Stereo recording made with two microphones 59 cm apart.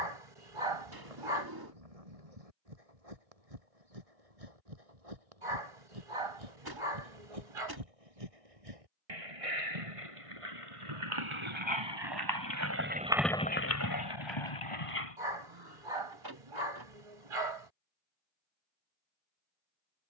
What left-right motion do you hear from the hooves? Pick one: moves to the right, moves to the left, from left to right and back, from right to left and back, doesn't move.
moves to the left.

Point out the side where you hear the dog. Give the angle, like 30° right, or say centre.
60° right.